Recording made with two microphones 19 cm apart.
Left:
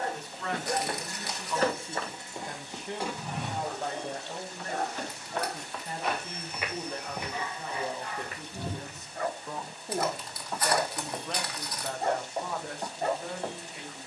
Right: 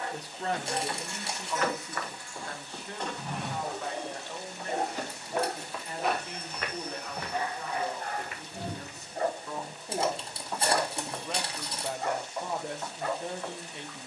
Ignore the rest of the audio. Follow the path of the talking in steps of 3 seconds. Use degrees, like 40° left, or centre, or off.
10° right, 30° left, 30° left, centre, 20° right.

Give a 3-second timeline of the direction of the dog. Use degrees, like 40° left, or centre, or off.
30° left, 20° right, 40° right, 10° right, 30° left.